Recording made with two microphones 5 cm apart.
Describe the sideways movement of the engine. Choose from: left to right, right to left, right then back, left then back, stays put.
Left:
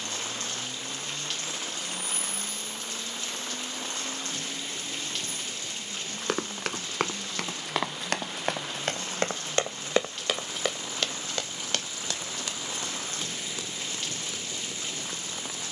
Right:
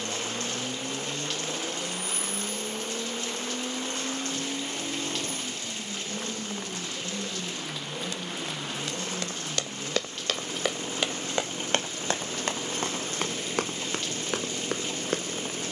stays put.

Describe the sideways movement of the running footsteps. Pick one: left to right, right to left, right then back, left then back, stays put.
left to right.